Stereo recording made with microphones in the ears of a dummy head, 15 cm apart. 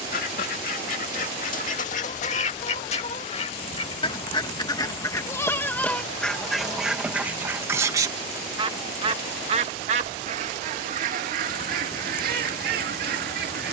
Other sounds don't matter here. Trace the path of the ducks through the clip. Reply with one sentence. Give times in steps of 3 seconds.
You can hear the ducks on the left from 0 s, in the centre from 6 s and on the right from 9 s.